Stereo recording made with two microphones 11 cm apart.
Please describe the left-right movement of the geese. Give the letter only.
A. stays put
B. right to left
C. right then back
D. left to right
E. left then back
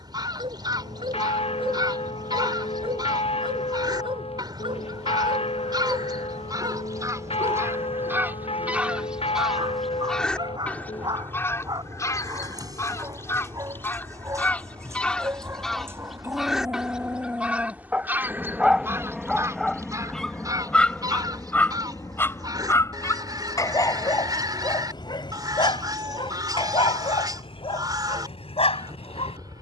E.